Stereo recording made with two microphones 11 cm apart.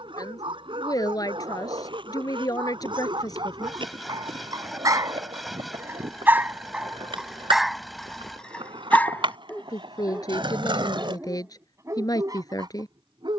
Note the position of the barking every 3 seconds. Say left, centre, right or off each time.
right, right, centre, centre, right.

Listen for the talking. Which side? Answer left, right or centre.
left.